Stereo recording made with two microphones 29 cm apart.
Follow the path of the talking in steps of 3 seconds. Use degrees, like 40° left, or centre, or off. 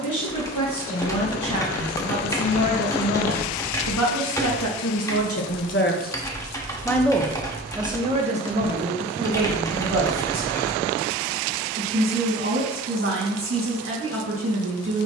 80° left, 60° left, 10° right, 40° right, 40° right.